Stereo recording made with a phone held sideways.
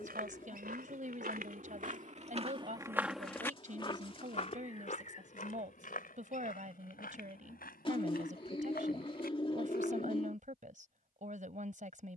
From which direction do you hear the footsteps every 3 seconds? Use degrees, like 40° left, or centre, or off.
60° right, 40° left, 70° left, 70° left.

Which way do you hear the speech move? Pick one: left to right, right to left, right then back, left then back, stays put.
stays put.